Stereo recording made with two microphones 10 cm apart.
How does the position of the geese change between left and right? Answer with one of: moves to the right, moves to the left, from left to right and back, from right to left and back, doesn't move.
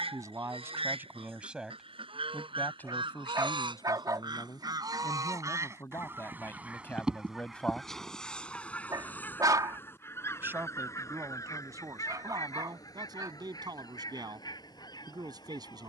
moves to the left.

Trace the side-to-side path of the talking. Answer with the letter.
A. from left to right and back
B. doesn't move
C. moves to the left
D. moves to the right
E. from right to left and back
E.